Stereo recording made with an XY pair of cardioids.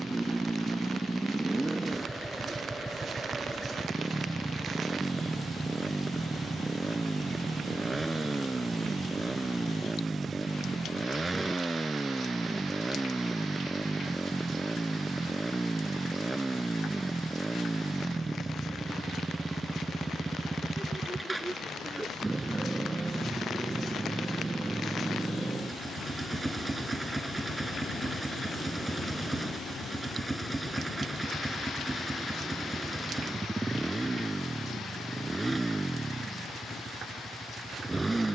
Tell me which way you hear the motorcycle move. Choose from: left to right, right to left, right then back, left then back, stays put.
stays put.